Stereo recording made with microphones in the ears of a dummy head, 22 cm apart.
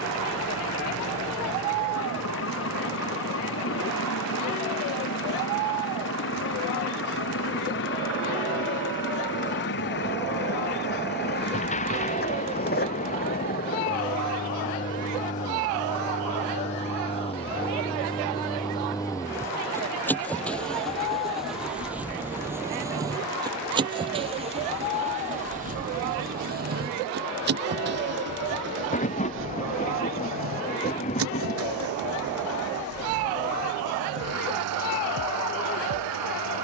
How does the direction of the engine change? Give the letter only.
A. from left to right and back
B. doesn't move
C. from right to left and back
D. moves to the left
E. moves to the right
E.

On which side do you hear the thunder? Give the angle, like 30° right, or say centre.
30° left.